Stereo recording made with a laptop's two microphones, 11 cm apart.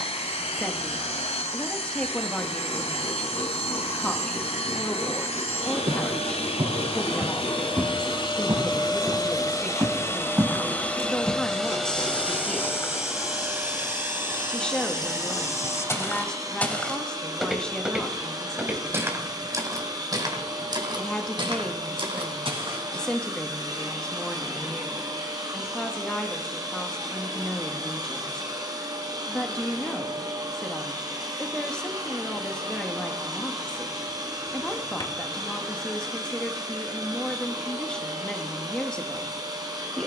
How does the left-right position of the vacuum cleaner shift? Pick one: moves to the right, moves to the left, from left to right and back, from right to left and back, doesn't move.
moves to the right.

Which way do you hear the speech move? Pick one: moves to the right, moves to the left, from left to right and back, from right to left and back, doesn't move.
doesn't move.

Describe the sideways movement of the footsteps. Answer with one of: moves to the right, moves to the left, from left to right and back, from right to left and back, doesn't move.
from right to left and back.